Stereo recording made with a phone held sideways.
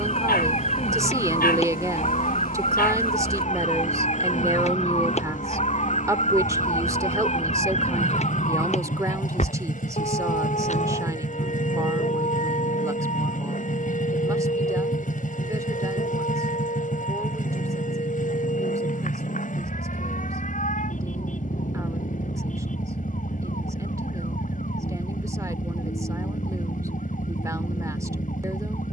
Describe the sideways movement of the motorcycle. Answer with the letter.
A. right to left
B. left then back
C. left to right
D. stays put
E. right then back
D.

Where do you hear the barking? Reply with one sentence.
You can hear the barking on the left.